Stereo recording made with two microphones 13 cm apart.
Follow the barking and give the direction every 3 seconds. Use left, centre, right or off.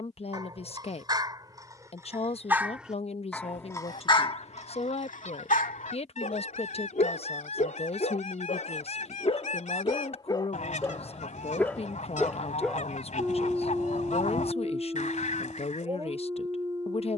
right, left, left, left, centre, right.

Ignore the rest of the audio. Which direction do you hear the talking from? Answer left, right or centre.
left.